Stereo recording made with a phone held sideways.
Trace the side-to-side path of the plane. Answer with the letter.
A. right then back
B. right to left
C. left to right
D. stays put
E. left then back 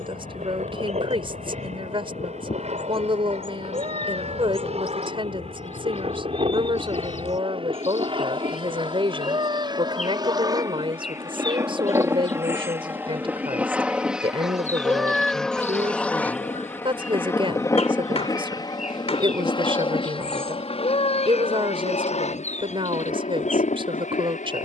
B.